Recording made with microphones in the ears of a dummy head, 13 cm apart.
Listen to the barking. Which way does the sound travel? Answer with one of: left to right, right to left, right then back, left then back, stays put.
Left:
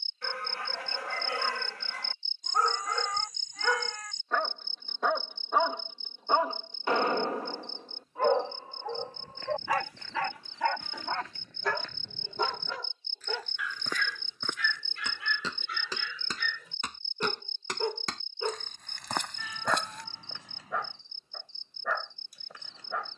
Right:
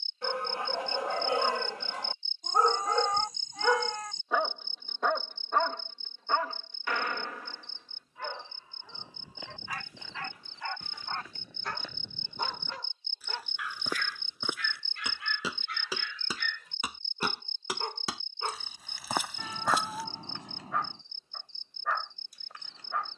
right to left.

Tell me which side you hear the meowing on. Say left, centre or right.
right.